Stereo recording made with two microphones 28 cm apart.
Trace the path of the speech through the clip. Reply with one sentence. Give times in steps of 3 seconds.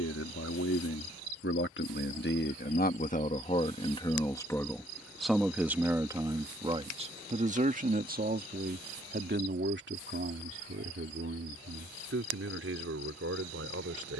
In this clip you hear the speech on the left from 0 s, in the centre from 3 s and on the right from 6 s.